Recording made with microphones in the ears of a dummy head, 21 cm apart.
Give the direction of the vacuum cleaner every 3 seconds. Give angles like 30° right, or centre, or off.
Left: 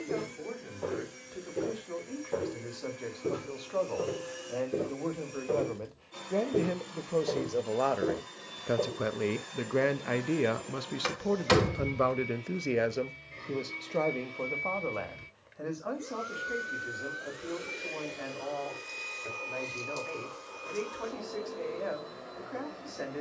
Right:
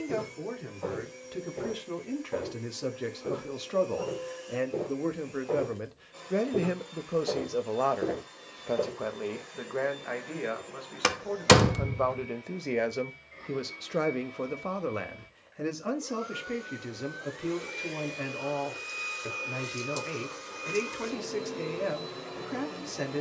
70° left, 70° left, 60° left, 60° left, 40° left, 20° left, 20° right, 40° right.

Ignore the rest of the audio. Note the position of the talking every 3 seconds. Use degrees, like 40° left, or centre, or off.
40° right, 30° right, centre, 40° left, 10° right, 40° right, 40° right, 40° right.